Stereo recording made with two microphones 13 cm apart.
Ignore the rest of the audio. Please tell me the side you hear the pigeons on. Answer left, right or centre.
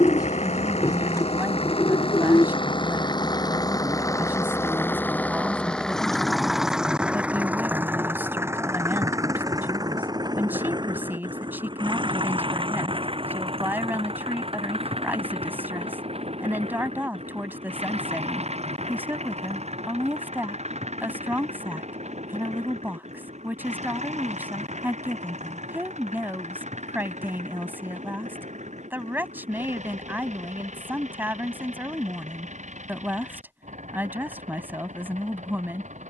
left.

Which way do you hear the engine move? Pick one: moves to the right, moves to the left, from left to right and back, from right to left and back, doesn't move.
moves to the right.